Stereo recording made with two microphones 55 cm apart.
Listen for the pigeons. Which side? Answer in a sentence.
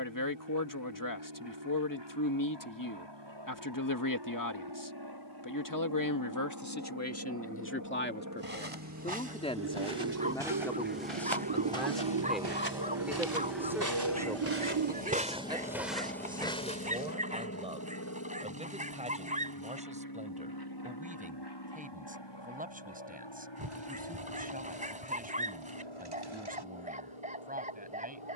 You can hear the pigeons on the right.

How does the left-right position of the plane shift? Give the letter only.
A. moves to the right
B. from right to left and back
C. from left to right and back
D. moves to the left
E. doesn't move
D.